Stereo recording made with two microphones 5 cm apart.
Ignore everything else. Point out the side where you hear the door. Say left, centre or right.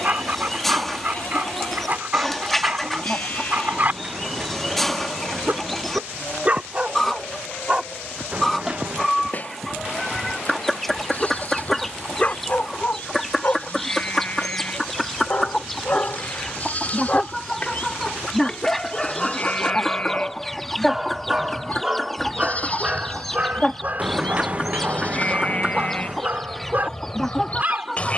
right.